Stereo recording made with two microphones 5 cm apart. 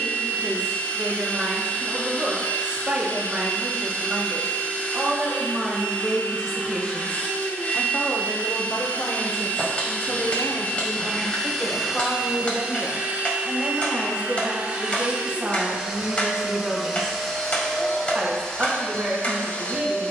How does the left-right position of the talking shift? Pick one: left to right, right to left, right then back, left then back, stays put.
left then back.